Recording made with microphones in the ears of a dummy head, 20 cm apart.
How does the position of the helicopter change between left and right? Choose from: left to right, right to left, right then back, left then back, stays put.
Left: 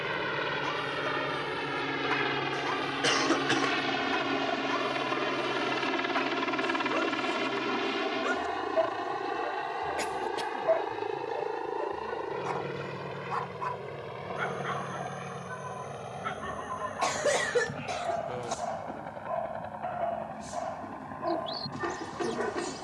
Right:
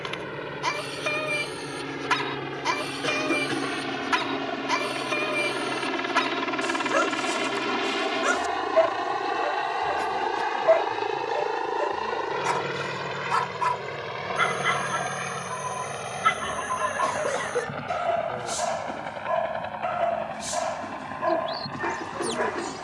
left to right.